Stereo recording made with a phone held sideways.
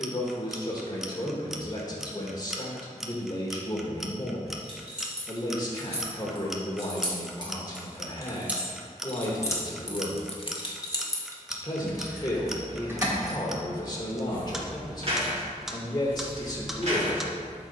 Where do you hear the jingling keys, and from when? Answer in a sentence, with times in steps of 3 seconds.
In this clip you hear the jingling keys not at all from 0 s, on the right from 3 s, on the left from 9 s and on the right from 12 s.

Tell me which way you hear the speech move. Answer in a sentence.
In this clip you hear the speech stay in one place.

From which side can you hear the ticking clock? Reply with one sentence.
In this clip you hear the ticking clock in the centre.